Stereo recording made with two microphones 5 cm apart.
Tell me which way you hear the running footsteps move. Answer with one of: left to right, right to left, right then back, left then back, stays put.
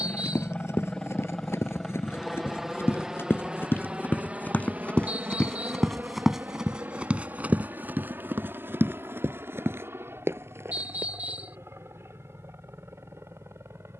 left to right.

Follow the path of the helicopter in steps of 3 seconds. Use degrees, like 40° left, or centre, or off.
10° left, 30° right, 40° right, 50° right, 60° right.